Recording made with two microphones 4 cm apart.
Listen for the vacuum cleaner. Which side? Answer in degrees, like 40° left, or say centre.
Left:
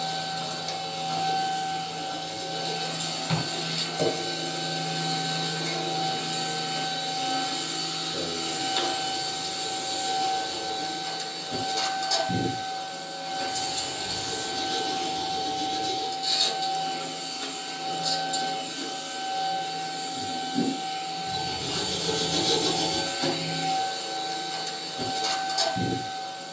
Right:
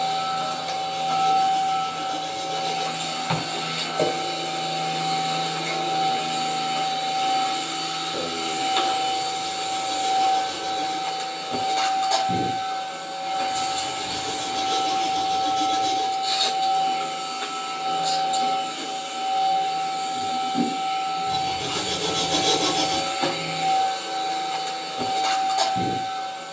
30° right.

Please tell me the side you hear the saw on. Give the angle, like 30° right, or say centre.
60° right.